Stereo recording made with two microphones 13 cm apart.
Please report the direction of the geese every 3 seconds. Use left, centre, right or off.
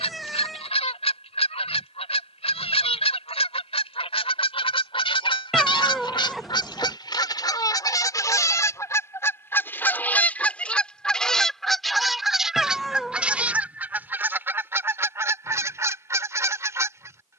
left, left, left, centre, centre, right.